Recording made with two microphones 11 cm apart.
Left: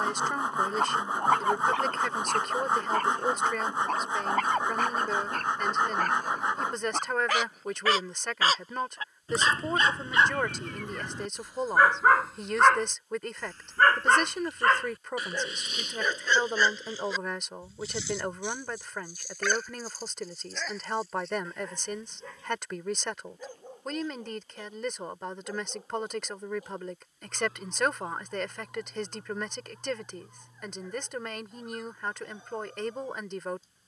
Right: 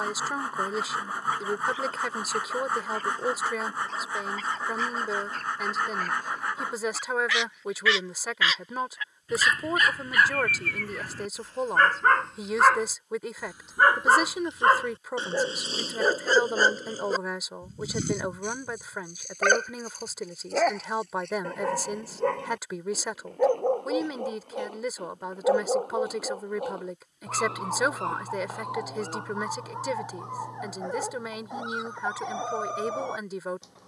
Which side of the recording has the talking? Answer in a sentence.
You can hear the talking in the centre.